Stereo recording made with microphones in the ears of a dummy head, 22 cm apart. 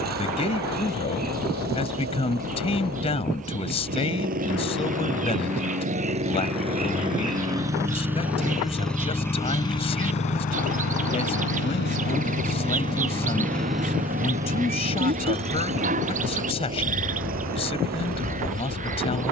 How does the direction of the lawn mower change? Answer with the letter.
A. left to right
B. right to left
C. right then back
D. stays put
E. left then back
E.